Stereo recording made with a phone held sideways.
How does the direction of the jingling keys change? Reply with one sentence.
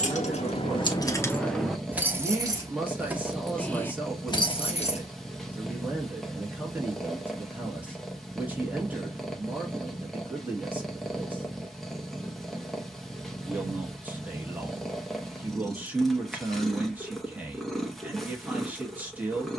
In this clip you hear the jingling keys go right and come back.